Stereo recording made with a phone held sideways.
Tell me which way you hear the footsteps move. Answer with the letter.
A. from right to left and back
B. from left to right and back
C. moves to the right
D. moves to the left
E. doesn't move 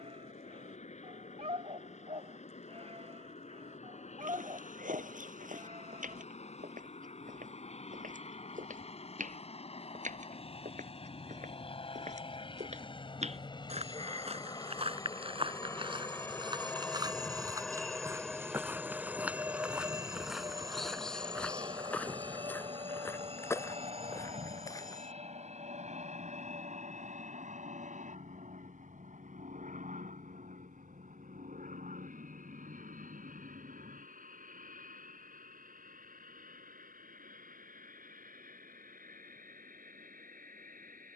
D.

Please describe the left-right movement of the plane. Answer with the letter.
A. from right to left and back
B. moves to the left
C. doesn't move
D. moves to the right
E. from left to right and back
D.